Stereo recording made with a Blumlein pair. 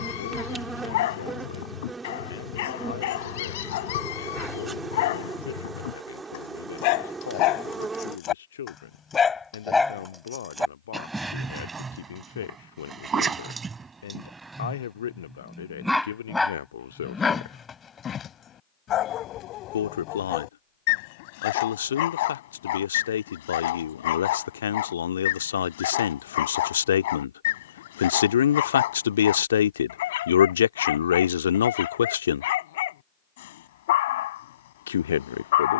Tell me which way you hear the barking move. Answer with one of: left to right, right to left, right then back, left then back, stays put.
right then back.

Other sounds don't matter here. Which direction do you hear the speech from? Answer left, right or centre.
left.